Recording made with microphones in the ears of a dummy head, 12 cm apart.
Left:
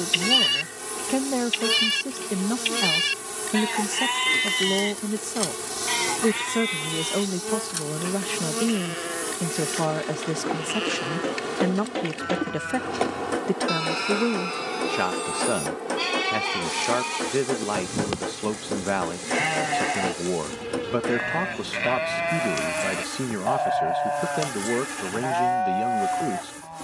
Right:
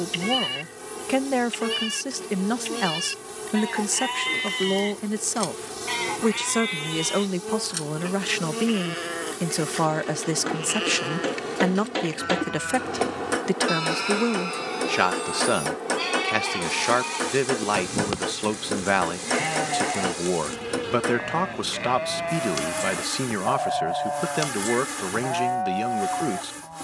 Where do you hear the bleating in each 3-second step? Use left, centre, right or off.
left, left, centre, centre, centre, centre, left, left, left.